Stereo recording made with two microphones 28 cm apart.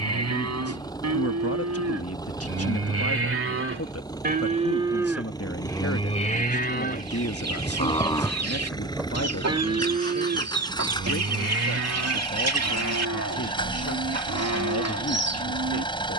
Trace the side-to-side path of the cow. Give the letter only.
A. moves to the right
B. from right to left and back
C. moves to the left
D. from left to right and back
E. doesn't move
B.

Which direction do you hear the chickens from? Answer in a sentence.
You can hear the chickens on the right.